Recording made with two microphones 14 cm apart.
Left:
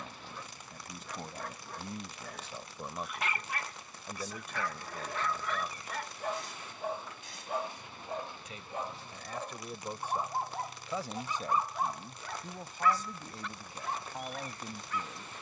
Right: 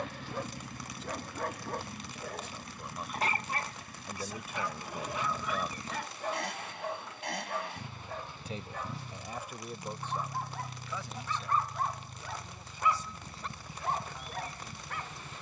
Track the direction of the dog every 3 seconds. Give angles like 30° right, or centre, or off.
50° right, 20° right, 10° left, 20° left, 30° right.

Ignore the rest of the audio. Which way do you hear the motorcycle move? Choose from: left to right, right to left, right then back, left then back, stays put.
stays put.